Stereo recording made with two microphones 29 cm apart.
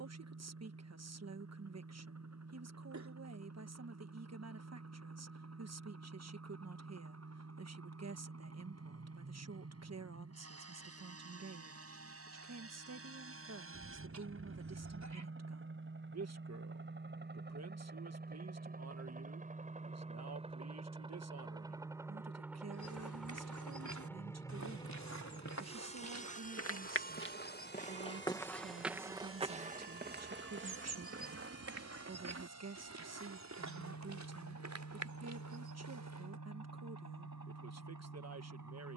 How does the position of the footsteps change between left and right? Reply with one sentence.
You can hear the footsteps travel towards the right.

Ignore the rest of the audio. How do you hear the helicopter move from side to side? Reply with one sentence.
You can hear the helicopter move to the left.